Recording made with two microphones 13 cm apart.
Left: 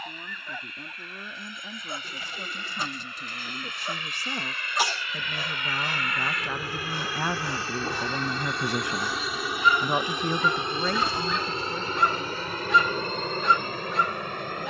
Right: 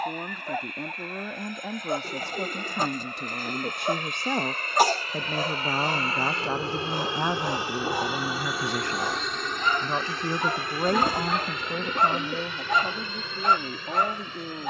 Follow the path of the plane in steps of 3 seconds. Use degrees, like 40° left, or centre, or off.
60° right, 50° right, 20° right, 20° left, 40° left.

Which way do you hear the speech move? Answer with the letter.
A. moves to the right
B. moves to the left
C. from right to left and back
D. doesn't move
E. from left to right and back
C.